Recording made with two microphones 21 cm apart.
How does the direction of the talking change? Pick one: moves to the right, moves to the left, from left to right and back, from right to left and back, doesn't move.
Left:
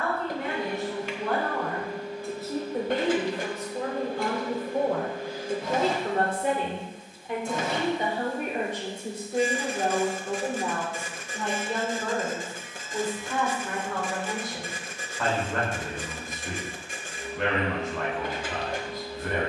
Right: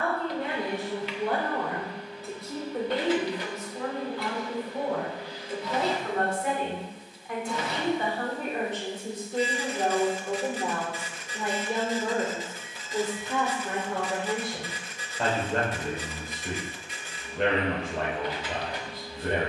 from right to left and back.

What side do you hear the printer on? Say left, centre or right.
left.